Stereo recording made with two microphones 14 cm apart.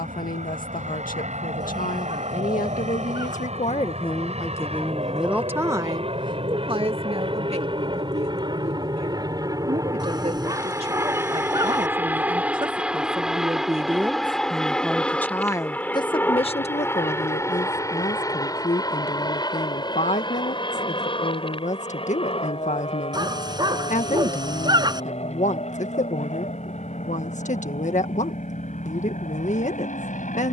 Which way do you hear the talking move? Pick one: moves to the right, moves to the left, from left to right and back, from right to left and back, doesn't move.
from left to right and back.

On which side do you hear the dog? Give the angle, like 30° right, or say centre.
30° right.